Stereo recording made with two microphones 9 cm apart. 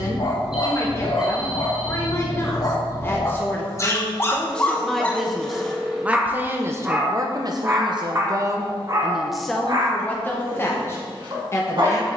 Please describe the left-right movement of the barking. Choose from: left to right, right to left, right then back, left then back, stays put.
left to right.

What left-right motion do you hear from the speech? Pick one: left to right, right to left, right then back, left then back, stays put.
right then back.